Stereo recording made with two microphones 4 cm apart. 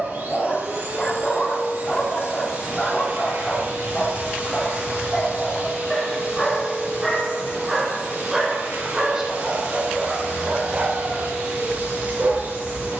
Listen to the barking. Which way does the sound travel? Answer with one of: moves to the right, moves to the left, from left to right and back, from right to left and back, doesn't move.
moves to the right.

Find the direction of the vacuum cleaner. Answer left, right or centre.
right.